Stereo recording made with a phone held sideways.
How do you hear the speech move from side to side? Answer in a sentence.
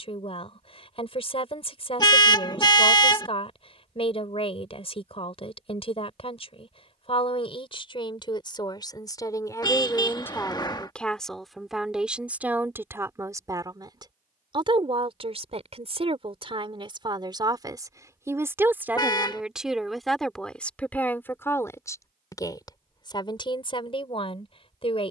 You can hear the speech move from left to right and back again.